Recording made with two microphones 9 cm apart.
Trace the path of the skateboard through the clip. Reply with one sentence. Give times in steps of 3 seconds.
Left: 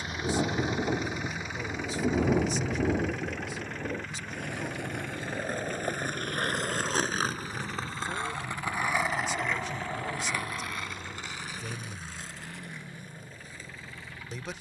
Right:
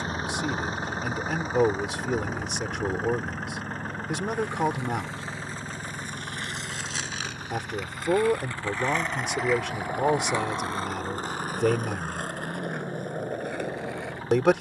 You can hear the skateboard not at all from 0 s, on the left from 3 s and on the right from 9 s.